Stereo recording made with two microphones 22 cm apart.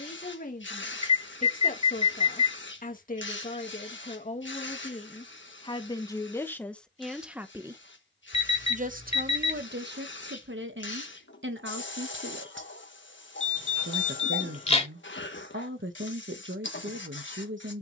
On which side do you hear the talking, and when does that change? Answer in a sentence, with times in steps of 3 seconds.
In this clip you hear the talking on the left from 0 s, in the centre from 6 s and on the right from 9 s.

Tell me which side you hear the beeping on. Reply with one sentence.
In this clip you hear the beeping on the left.